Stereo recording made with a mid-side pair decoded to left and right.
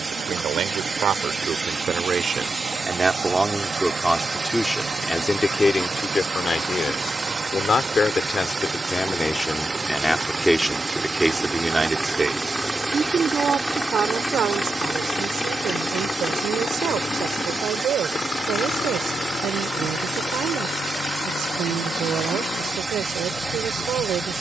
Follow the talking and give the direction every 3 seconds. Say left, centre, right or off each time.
right, centre, left, centre, right, right, right, right.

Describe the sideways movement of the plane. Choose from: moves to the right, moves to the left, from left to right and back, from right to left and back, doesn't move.
moves to the left.